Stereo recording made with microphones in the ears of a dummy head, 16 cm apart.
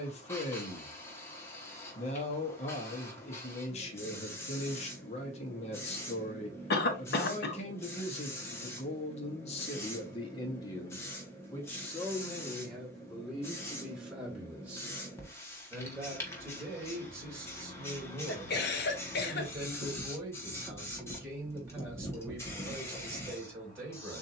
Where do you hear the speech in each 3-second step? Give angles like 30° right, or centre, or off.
40° left, 40° left, 40° left, 20° left, centre, 10° right, 10° right, 10° right.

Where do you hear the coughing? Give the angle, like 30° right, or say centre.
60° left.